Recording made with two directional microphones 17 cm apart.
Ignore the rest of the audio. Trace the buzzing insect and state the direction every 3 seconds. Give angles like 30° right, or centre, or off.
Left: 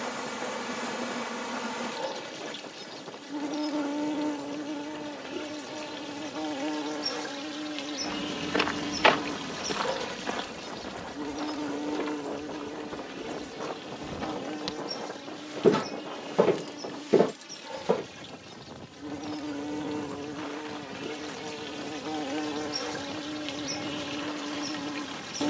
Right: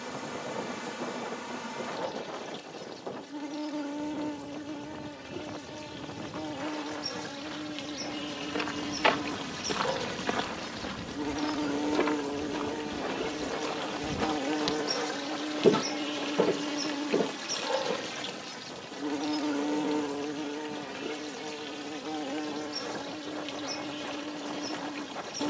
30° left, 30° left, 20° left, centre, 30° right, 50° right, 30° right, 10° left, 20° left.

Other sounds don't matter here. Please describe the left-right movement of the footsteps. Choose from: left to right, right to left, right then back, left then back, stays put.
right then back.